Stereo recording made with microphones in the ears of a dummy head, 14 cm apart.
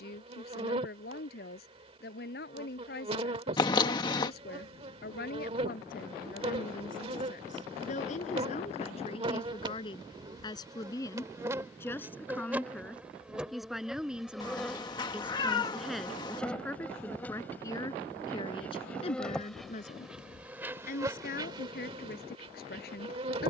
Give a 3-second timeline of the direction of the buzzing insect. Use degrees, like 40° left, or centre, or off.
40° right, 40° right, 40° right, 20° right, 10° right, 10° left, centre, 30° right.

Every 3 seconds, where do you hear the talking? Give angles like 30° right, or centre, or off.
60° left, 60° left, 50° left, 30° left, centre, 10° left, 40° left, 60° left.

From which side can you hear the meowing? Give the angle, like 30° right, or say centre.
30° left.